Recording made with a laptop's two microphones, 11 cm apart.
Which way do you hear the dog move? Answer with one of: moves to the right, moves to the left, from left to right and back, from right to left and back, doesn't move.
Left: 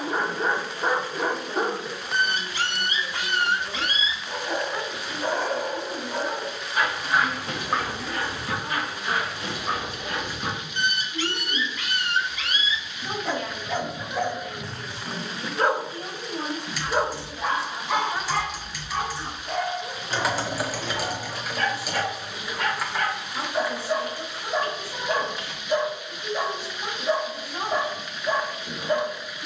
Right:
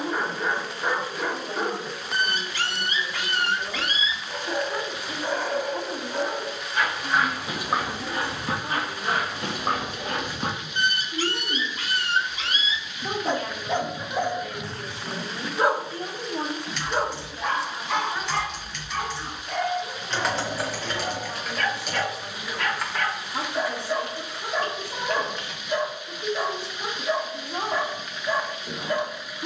from left to right and back.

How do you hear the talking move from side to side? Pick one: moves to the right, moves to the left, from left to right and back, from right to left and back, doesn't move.
from right to left and back.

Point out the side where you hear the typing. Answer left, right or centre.
centre.